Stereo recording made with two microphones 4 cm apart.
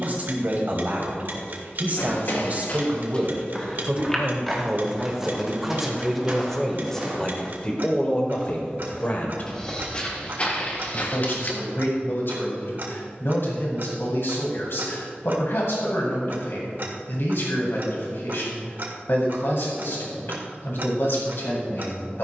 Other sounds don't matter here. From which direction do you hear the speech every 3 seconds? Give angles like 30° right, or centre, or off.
40° right, 20° right, 20° left, 50° left, 60° left, 60° left, 60° left, 60° left.